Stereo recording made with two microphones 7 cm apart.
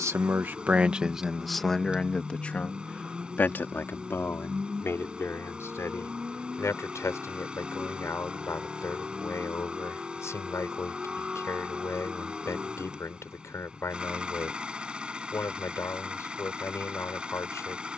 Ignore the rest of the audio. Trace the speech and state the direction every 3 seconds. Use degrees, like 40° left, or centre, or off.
centre, 30° left, 40° left, 40° left, 40° left, 40° left.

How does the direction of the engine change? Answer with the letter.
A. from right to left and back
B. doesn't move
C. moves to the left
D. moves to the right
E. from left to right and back
B.